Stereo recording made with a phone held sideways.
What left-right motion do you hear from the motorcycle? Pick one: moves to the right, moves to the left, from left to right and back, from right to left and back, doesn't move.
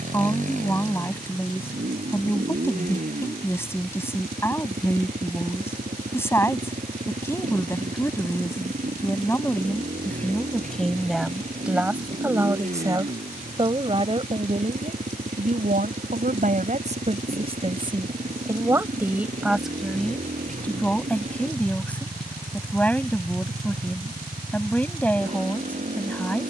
doesn't move.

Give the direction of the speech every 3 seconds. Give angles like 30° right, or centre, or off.
20° left, 20° left, 20° left, 10° left, 30° right, 50° right, centre, 10° left, 10° left.